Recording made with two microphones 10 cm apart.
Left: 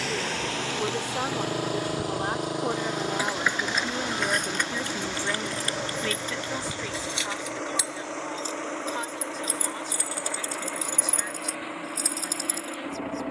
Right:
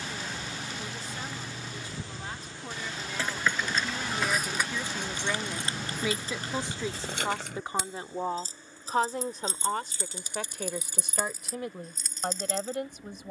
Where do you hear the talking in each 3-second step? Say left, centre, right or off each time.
left, left, right, right, right.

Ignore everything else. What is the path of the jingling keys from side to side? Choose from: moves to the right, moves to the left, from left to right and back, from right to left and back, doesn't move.
from left to right and back.